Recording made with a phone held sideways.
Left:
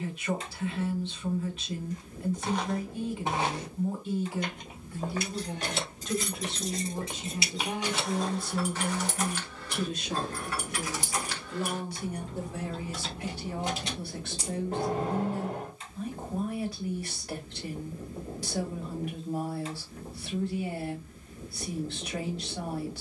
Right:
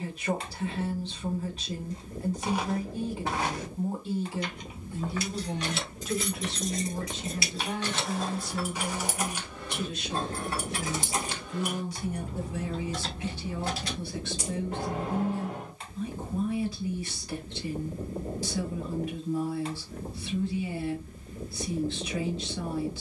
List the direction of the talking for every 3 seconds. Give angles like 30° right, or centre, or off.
40° right, 30° right, 20° left, 50° left, 60° left, 60° left, 60° left, 60° left.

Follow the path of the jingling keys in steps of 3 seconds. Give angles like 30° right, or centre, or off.
off, 50° left, 20° left, 20° right, 10° left, 50° left, off, off.